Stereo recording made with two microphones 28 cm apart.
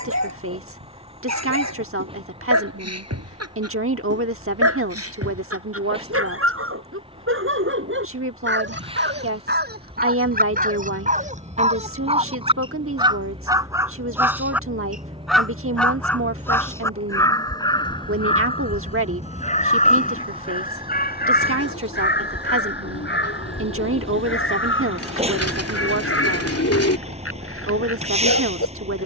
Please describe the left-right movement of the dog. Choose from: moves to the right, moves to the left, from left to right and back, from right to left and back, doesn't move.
moves to the left.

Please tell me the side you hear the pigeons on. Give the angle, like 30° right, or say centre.
50° left.